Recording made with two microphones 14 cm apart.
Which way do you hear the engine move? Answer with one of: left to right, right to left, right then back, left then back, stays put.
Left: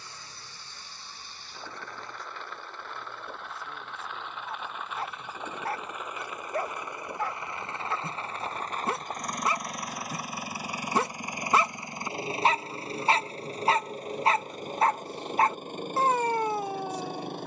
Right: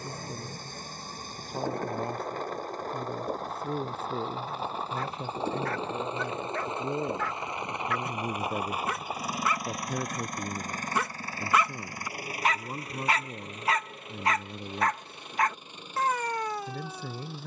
right to left.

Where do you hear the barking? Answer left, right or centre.
left.